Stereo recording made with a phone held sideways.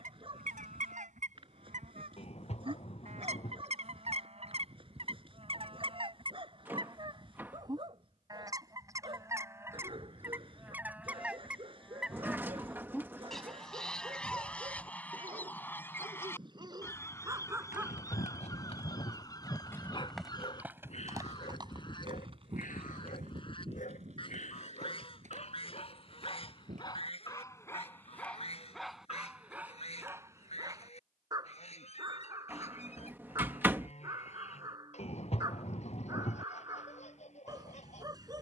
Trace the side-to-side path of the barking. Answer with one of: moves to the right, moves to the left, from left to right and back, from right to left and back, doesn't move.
from right to left and back.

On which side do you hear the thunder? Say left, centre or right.
left.